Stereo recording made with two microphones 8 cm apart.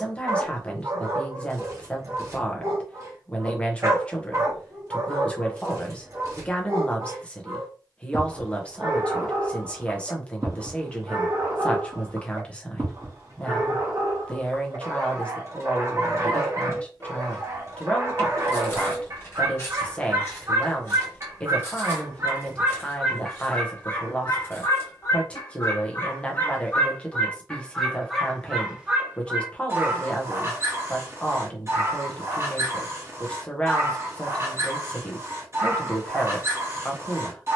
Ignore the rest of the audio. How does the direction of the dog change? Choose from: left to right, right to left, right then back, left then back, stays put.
left then back.